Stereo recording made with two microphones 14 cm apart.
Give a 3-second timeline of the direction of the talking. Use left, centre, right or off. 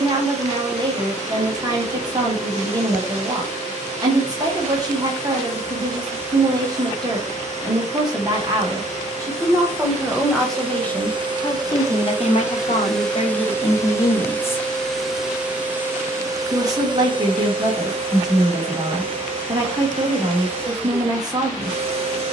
right, right, right, centre, left, right, right, right.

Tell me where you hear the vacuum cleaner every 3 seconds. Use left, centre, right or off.
right, right, right, right, centre, right, right, right.